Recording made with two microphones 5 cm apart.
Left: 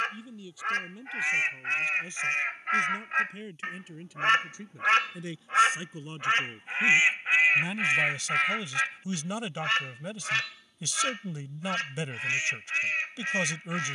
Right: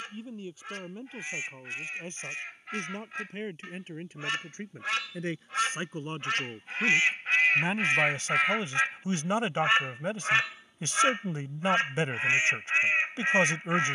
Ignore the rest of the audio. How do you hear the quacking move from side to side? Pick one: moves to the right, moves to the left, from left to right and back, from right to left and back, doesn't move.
moves to the right.